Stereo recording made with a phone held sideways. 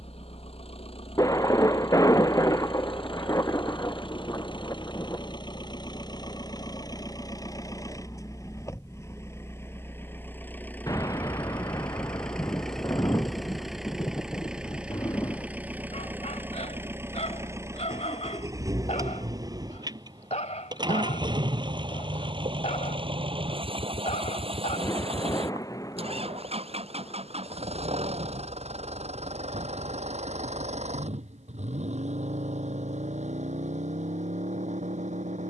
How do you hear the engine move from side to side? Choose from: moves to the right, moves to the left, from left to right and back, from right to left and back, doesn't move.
moves to the right.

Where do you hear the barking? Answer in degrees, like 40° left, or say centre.
60° left.